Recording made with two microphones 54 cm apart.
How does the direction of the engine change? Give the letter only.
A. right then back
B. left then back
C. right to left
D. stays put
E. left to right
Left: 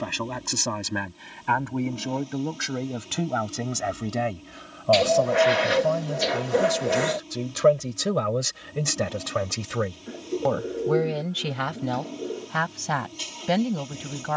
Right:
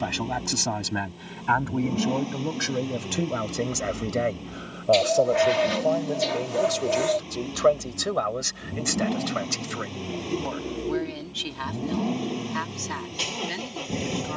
D.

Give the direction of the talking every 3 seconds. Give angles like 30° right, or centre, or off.
centre, 20° left, 40° left, 70° left, 80° left.